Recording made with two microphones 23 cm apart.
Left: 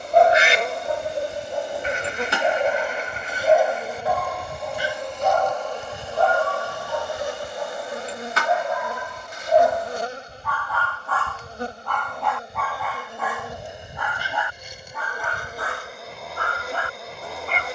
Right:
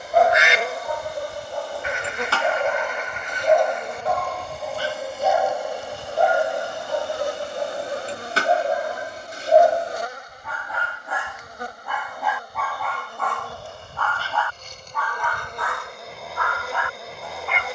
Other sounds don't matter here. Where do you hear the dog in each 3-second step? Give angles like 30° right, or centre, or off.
20° left, centre, 30° right, 30° right, 10° left, 40° left.